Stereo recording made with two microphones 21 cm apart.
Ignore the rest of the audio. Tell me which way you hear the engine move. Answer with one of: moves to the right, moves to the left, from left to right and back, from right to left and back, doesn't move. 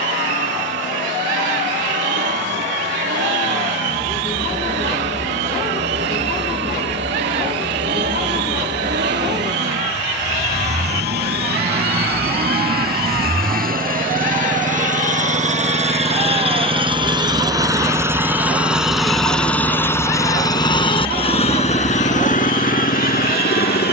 moves to the left.